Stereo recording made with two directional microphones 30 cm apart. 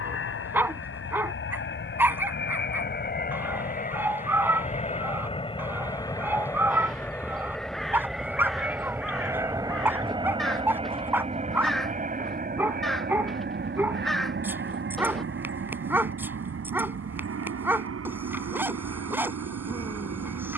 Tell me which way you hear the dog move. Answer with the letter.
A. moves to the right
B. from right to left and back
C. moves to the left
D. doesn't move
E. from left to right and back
D.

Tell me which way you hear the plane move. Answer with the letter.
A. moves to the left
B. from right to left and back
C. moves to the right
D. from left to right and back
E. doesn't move
C.